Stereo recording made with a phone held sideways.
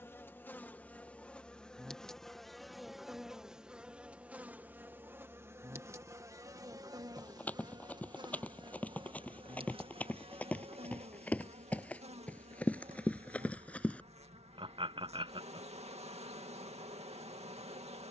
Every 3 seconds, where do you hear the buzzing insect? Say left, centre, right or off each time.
centre, centre, right, right, right, right.